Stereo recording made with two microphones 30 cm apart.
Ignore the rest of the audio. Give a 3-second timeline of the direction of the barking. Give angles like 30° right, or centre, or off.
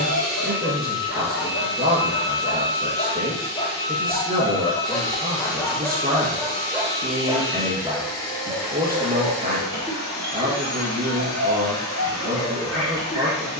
50° left, 20° left, 10° right, 40° right, 50° right.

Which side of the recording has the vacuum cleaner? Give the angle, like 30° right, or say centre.
10° left.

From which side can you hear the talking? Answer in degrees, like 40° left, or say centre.
30° right.